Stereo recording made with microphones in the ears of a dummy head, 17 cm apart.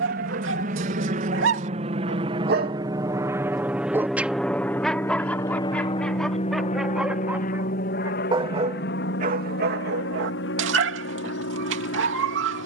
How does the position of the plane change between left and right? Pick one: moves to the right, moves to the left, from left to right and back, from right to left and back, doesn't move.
moves to the left.